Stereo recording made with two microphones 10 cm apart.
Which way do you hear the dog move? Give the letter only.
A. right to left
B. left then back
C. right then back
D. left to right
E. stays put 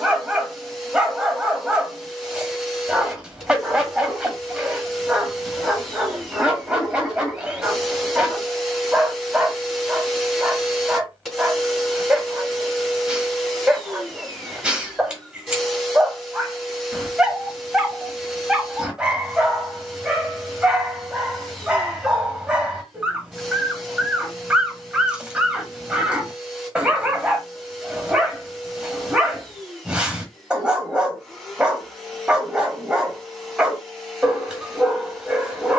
E.